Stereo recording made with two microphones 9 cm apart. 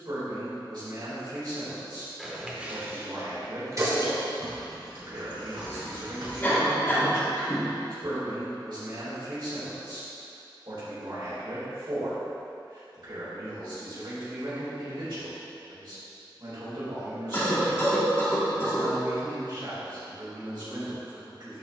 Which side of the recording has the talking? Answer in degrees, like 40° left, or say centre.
60° right.